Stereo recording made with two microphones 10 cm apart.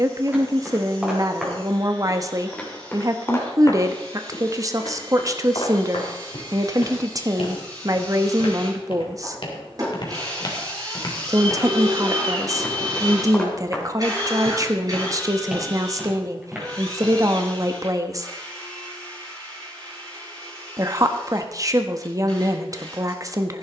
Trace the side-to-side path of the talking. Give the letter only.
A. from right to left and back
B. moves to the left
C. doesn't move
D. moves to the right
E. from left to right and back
C.